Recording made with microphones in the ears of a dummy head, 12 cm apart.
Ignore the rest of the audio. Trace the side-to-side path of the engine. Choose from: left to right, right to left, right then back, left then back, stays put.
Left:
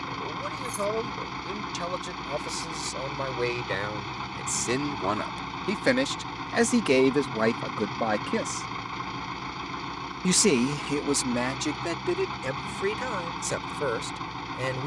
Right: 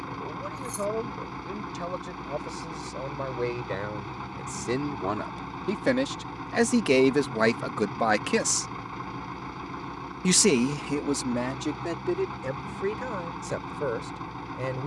stays put.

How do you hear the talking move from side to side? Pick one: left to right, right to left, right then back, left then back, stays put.
right then back.